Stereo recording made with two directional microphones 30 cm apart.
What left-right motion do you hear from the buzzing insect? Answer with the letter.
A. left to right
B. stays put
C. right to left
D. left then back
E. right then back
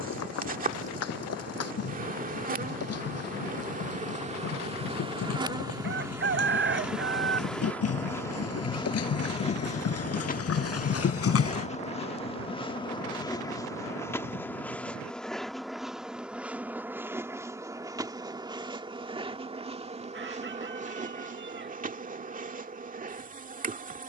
D.